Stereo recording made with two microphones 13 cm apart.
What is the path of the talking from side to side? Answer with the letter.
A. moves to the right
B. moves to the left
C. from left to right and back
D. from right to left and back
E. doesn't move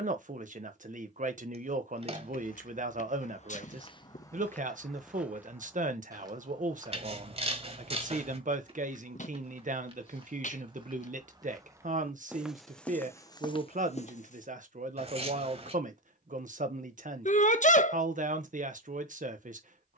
E.